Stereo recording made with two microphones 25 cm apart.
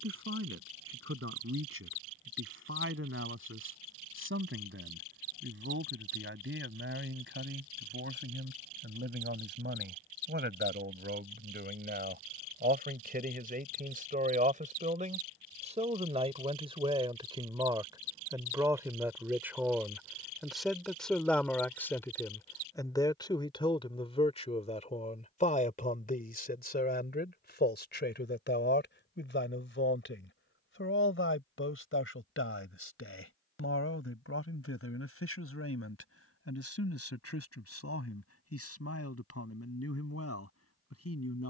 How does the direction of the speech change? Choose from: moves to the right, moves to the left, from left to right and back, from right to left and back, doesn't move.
moves to the left.